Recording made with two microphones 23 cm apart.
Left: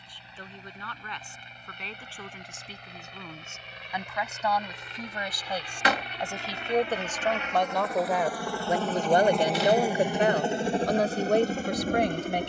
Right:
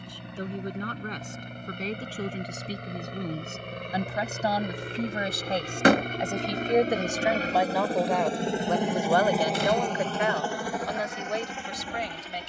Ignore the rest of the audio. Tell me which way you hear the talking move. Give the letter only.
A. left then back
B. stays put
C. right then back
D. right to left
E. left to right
D.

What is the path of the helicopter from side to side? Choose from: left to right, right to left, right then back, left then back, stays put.
right to left.